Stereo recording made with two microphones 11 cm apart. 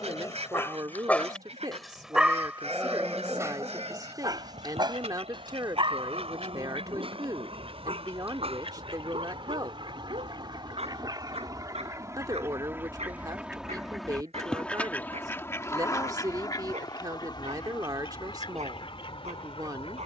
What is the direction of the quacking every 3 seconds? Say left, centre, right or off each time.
right, right, right, right, centre, left, left.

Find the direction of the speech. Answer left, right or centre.
right.